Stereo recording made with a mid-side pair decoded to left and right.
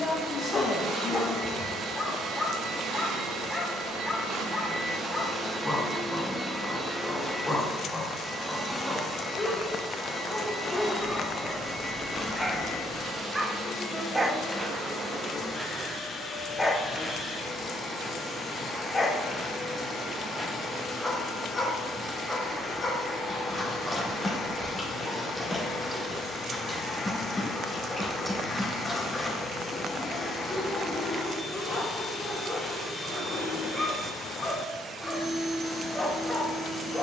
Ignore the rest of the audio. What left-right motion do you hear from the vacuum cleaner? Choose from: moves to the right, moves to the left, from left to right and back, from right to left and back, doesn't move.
moves to the left.